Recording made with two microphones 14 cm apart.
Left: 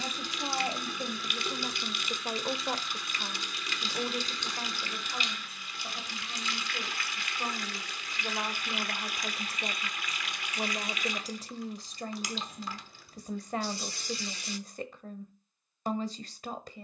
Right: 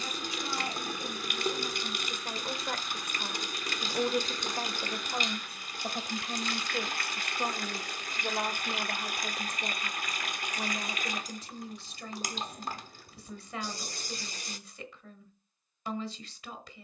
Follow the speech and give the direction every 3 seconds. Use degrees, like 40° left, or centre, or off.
40° left, 30° right, 30° right, 20° left, 50° left, 50° left.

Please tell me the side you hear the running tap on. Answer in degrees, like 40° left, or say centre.
50° right.